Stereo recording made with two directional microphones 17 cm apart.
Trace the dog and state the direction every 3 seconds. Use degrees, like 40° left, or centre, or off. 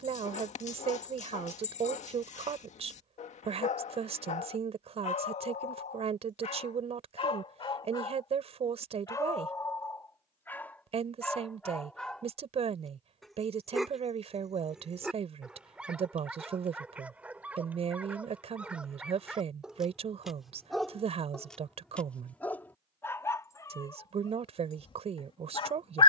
40° left, 40° left, 30° left, 10° left, centre, 10° right, centre, 10° left, 30° left.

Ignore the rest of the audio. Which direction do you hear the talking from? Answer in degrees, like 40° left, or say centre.
40° right.